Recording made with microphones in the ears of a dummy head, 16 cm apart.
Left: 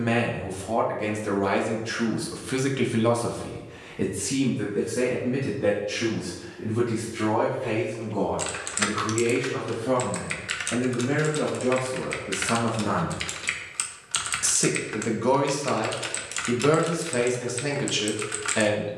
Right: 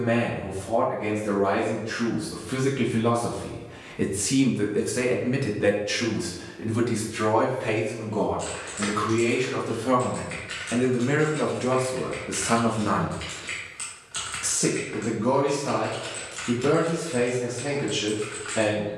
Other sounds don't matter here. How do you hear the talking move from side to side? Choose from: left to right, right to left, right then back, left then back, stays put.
right then back.